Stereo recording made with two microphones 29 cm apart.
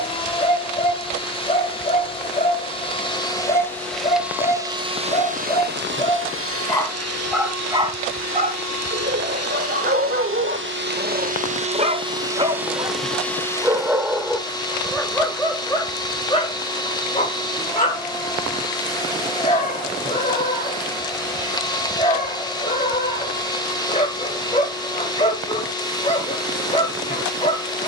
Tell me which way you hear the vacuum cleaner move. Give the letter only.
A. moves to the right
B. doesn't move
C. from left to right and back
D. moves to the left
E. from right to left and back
C.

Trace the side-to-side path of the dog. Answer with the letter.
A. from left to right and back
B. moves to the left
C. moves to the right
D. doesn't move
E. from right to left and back
A.